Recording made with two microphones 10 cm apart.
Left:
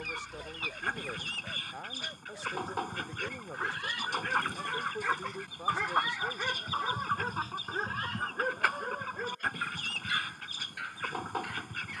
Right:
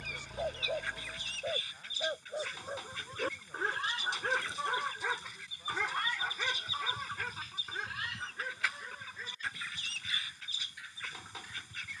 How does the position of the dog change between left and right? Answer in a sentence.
In this clip you hear the dog travel towards the left.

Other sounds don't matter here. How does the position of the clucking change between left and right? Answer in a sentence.
In this clip you hear the clucking stay put.